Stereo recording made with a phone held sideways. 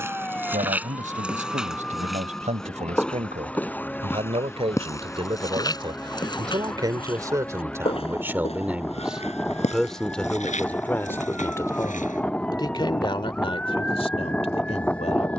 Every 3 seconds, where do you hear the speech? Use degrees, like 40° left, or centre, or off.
50° right, 40° right, 20° right, 10° left, 40° left.